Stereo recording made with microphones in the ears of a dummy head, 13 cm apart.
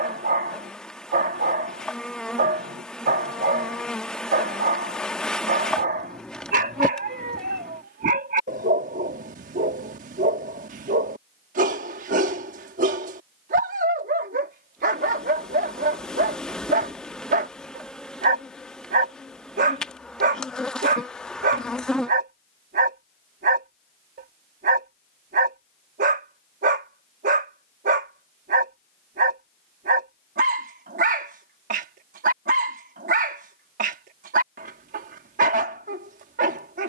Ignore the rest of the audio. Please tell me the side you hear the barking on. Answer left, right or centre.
right.